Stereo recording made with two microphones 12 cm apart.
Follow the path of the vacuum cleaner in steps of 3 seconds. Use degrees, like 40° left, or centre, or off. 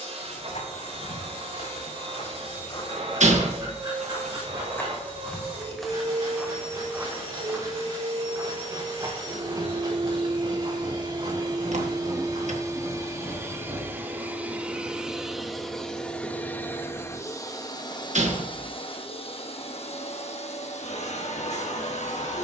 50° right, 50° right, 50° right, 40° right, 20° right, 10° left, 50° left, 70° left.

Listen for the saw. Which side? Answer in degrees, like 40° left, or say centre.
30° right.